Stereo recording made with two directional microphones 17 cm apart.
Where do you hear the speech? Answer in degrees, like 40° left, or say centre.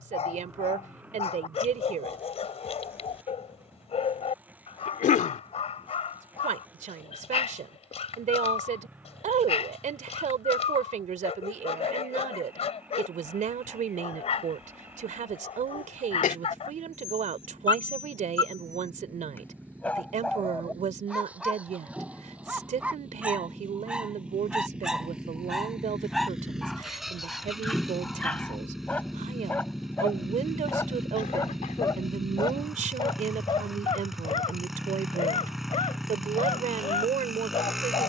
50° right.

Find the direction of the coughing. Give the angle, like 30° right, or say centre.
50° left.